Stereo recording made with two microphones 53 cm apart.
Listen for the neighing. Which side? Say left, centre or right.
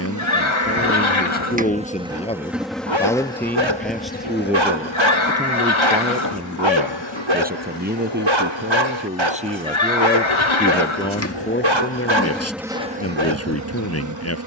left.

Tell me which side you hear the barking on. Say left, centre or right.
right.